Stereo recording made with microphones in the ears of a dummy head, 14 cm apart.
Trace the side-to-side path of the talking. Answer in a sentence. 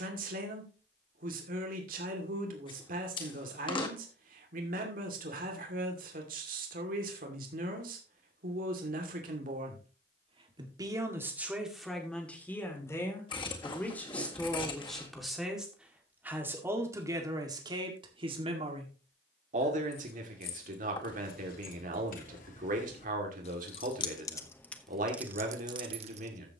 You can hear the talking move from right to left and back again.